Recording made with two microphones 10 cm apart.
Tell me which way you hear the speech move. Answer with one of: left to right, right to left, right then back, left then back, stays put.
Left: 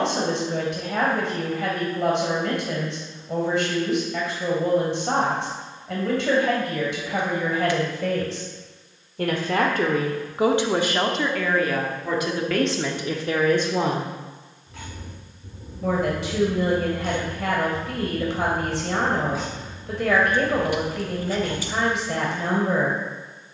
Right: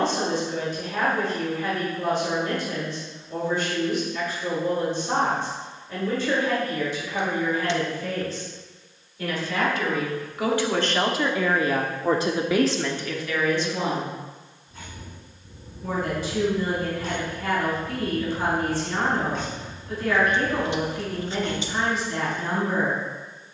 right then back.